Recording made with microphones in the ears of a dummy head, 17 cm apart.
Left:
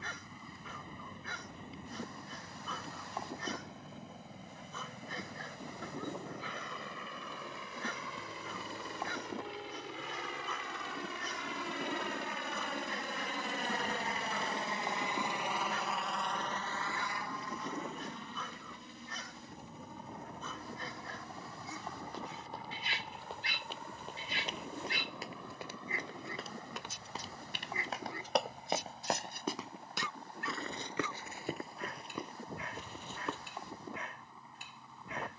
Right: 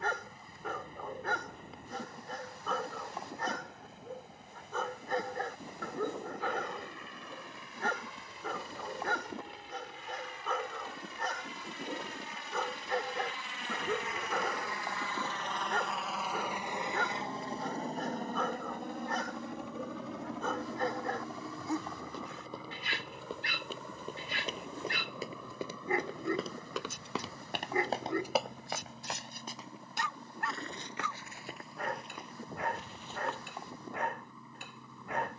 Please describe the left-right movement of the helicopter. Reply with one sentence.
In this clip you hear the helicopter move from left to right.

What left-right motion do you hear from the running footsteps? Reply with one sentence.
You can hear the running footsteps move to the left.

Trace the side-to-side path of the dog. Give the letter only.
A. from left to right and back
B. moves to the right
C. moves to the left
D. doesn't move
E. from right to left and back
D.